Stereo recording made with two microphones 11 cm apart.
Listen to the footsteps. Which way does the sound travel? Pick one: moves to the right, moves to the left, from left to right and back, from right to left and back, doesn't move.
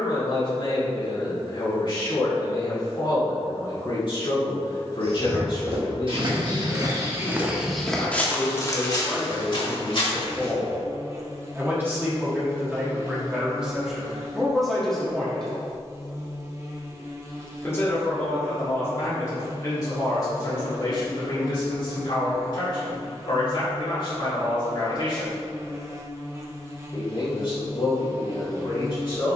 moves to the left.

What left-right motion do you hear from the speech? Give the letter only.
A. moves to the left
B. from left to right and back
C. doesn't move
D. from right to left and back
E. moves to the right
B.